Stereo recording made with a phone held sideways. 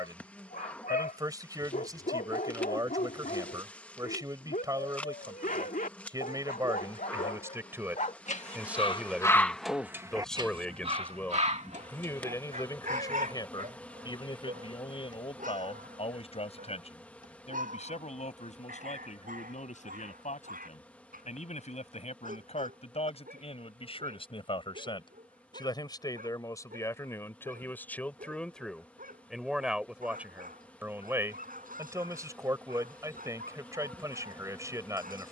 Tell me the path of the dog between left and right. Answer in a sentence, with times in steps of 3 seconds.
You can hear the dog on the left from 0 s and on the right from 9 s.